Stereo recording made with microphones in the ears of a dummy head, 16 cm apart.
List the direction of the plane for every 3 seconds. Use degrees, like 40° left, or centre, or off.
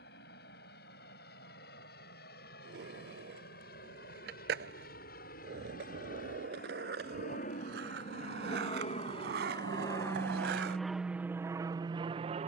70° left, 70° left, 50° left, 10° left.